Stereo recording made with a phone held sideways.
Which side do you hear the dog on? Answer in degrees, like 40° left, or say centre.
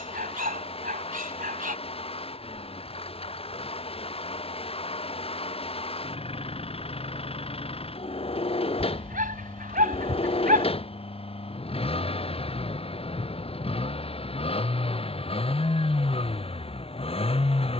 60° right.